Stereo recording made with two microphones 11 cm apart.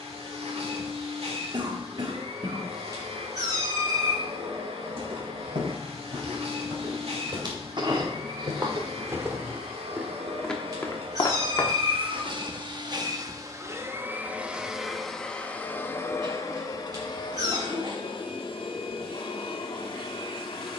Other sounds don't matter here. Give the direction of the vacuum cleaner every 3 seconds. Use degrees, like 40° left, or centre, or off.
70° right, 70° right, 70° right, 60° right, 30° right, 30° left, 50° left.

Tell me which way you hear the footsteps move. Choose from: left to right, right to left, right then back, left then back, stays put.
right to left.